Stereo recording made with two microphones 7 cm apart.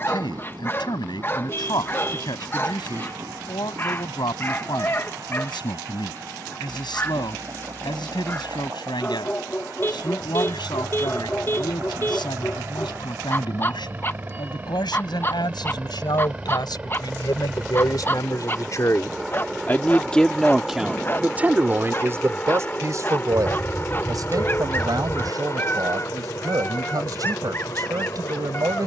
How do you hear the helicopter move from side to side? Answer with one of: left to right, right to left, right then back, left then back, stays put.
right to left.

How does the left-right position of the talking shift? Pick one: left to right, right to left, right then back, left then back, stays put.
left to right.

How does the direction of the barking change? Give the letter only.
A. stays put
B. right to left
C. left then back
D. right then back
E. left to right
A.